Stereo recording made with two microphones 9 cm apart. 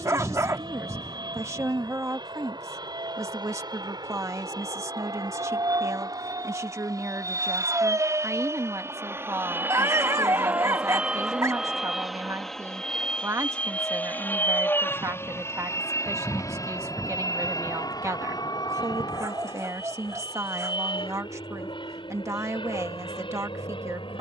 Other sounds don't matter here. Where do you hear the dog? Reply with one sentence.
You can hear the dog on the right.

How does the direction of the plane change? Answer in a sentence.
In this clip you hear the plane go from the right side to the left.